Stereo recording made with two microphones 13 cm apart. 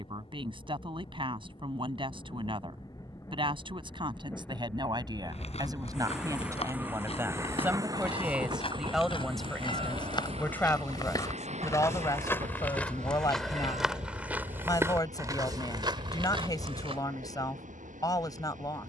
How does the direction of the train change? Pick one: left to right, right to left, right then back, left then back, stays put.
left to right.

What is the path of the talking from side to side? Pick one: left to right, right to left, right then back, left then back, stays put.
right to left.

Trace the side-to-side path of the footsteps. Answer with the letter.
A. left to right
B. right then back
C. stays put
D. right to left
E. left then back
A.